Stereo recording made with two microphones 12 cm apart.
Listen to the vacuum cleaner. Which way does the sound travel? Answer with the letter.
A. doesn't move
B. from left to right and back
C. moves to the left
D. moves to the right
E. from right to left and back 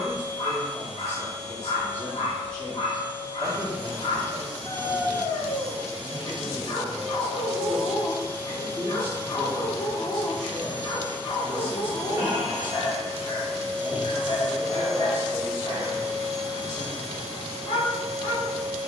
C.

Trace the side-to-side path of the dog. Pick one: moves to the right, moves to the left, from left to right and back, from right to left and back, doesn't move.
doesn't move.